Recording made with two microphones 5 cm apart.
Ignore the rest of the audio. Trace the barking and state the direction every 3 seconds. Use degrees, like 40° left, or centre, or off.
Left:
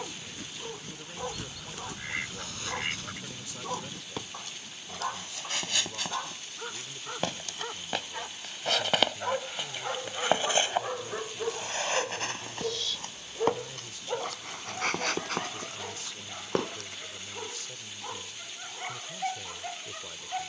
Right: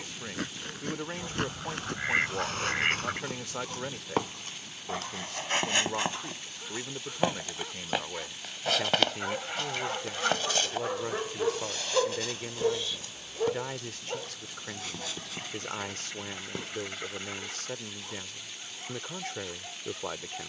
40° left, 40° left, 30° left, centre, centre, 40° left, 40° left.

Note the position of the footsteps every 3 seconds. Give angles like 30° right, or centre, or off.
50° right, 40° right, 20° right, 20° left, 50° left, 60° left, off.